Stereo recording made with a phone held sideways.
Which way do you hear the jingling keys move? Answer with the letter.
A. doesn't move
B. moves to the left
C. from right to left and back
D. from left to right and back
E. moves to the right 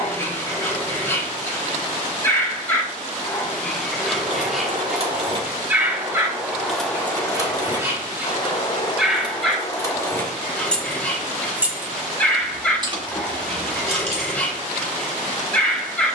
C.